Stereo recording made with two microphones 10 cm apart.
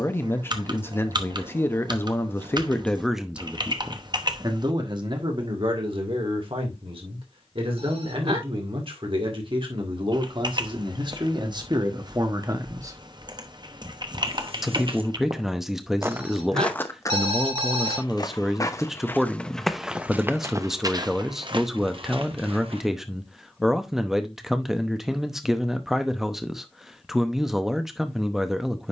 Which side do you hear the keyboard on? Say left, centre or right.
right.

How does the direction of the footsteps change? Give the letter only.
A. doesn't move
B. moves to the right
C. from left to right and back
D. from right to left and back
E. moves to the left
D.